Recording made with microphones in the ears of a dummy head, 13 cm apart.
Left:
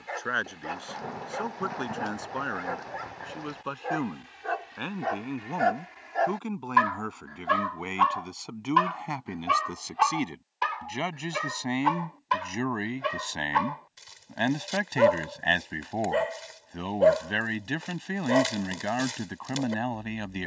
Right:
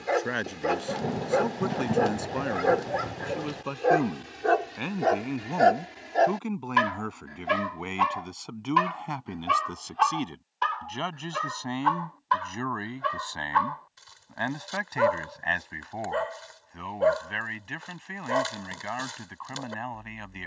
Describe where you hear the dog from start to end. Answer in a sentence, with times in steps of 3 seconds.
In this clip you hear the dog on the right from 0 s, in the centre from 9 s and on the left from 12 s.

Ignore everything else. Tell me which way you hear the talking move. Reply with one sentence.
You can hear the talking go from the right side to the left.